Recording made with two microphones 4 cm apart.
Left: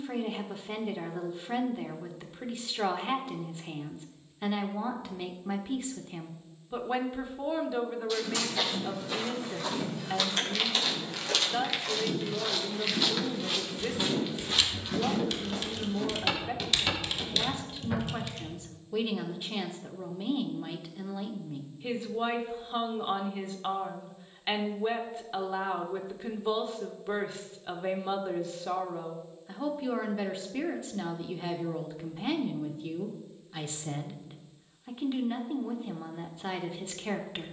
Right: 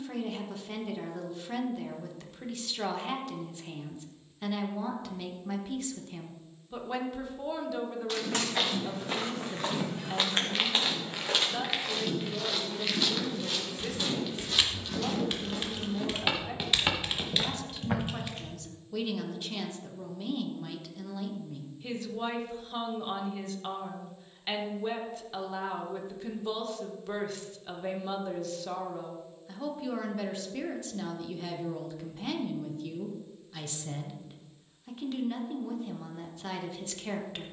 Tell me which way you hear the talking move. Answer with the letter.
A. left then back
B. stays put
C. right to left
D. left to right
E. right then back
B.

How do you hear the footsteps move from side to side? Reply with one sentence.
You can hear the footsteps move from right to left and back again.